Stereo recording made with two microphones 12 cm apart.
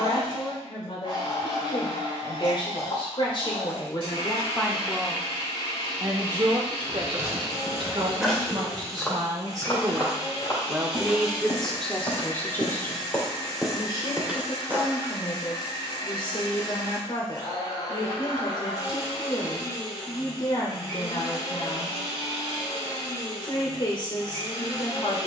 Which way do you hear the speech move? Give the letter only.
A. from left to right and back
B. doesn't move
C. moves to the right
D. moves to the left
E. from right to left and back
A.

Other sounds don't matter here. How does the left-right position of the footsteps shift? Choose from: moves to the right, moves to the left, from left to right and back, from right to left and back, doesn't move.
from right to left and back.